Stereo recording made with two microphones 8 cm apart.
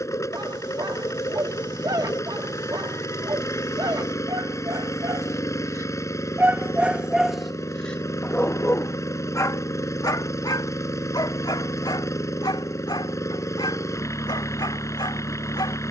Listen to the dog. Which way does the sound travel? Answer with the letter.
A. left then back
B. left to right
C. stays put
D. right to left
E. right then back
D.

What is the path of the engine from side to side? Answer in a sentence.
In this clip you hear the engine stay put.